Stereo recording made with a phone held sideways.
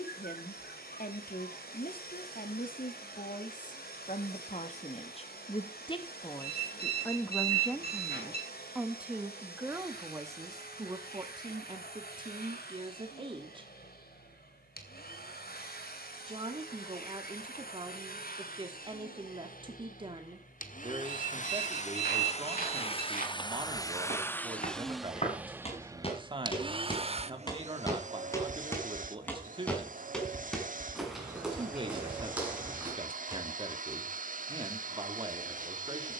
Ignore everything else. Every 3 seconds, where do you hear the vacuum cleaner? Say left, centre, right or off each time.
left, left, left, left, left, left, left, left, centre, right, right, right.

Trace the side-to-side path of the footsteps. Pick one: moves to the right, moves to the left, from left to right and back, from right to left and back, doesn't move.
moves to the right.